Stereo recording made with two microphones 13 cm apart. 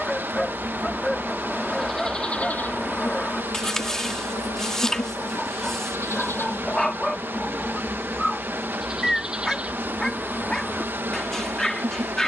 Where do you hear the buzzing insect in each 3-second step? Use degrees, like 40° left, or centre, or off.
centre, 30° left, 10° left, 20° right.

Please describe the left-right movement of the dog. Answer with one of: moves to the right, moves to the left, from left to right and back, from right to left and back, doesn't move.
doesn't move.